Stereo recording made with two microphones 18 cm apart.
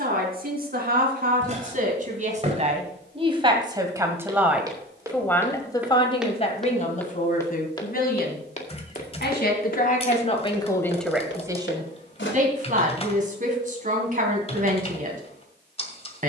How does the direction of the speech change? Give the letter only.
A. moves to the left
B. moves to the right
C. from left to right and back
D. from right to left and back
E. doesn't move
D.